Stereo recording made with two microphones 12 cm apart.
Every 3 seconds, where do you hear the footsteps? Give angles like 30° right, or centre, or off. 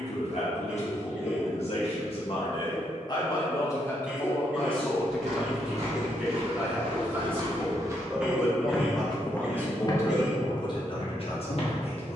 off, 60° right, 40° right, 40° left.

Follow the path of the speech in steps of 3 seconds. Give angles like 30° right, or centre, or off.
60° left, 10° left, 10° right, 30° left.